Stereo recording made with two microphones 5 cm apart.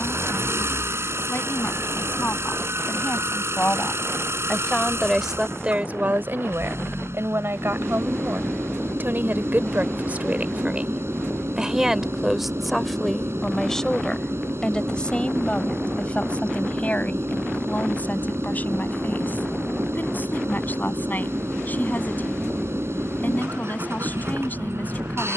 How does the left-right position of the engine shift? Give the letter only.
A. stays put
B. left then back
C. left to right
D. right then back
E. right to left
A.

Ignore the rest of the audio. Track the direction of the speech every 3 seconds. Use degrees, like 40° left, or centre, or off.
40° left, 10° left, 60° right, 30° right, 10° left, 30° left, 40° left, 40° left, 40° left.